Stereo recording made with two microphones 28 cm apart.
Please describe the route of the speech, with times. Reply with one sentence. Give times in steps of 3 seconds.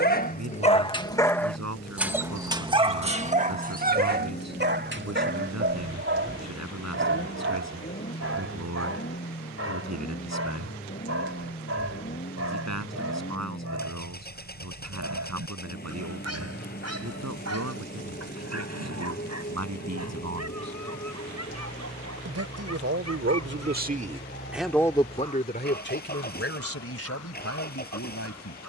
In this clip you hear the speech on the right from 0 s and on the left from 24 s.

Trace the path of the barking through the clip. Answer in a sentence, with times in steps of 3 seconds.
In this clip you hear the barking in the centre from 0 s and on the right from 3 s.